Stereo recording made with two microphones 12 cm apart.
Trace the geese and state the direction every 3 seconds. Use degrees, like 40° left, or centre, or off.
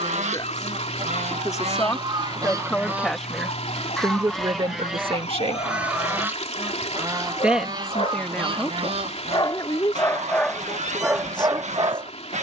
50° right, centre, 30° right, 70° right.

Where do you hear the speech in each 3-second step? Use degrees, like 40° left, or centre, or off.
30° left, 30° right, 10° left, 40° left.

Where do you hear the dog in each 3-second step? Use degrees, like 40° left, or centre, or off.
70° left, 70° left, 60° left, centre.